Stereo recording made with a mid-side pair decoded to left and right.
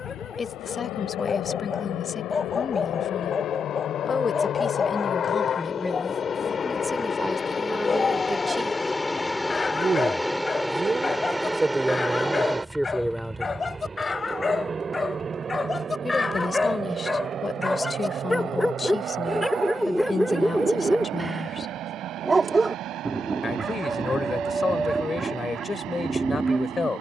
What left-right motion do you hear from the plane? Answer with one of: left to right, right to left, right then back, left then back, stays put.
left to right.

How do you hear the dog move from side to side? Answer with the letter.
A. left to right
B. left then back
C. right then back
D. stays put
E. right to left
A.